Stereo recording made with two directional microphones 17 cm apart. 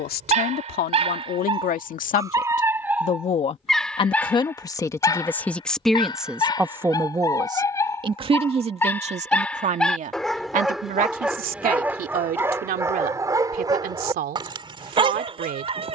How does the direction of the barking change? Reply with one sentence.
In this clip you hear the barking move from right to left and back again.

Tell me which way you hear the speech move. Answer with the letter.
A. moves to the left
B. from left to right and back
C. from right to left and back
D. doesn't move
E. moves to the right
E.